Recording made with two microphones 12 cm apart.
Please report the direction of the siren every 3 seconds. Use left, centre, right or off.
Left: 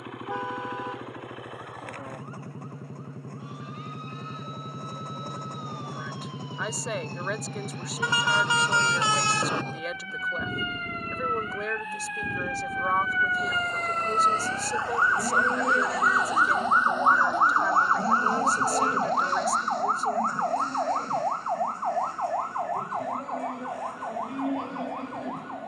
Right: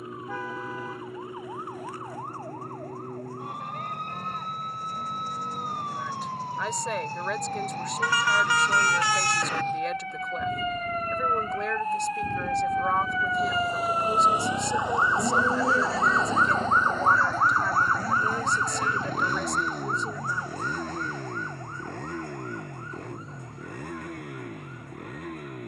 right, right, right, right, right, centre, left, left, left.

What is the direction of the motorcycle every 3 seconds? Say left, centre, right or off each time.
left, left, left, left, centre, right, right, right, right.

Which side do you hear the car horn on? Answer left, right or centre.
left.